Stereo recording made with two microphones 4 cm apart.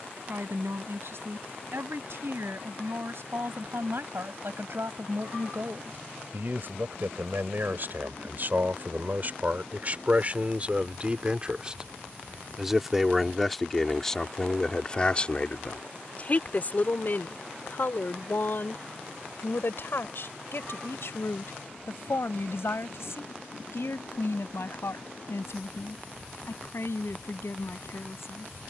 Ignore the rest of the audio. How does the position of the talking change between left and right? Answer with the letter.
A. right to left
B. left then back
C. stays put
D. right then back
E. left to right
A.